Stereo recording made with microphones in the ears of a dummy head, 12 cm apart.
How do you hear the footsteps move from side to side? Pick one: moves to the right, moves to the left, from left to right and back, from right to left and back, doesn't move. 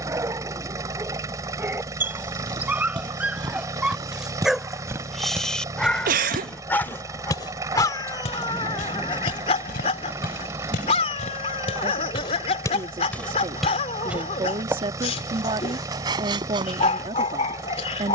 from right to left and back.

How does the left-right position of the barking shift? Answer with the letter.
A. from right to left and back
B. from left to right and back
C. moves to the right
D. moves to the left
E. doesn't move
D.